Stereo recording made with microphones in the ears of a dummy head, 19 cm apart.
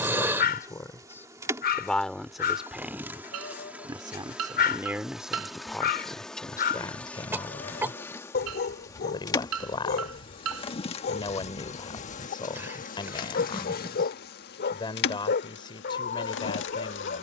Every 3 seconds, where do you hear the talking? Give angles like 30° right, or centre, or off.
10° left, 10° right, 20° left, 20° left, 20° left, 20° left.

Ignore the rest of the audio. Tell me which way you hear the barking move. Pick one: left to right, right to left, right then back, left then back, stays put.
stays put.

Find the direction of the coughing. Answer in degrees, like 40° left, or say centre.
10° right.